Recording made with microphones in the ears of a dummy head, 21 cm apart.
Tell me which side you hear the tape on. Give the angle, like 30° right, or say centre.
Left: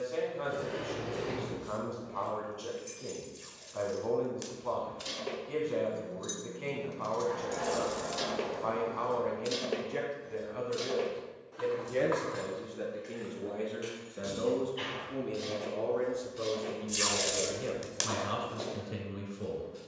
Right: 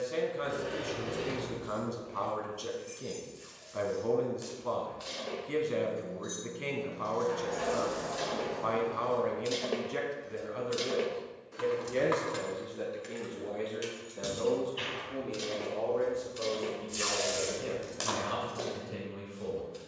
40° left.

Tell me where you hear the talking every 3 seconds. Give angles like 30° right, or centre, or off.
30° right, 30° right, 30° right, 10° right, 10° left, 20° left, 30° left.